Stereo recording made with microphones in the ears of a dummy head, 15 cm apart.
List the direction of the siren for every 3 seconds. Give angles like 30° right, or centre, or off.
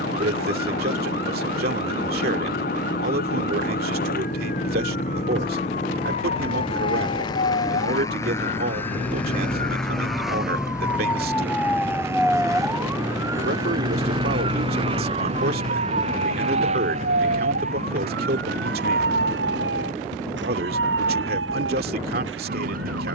60° left, 60° left, 40° left, 20° left, 20° right, 50° right, 70° right, 80° right.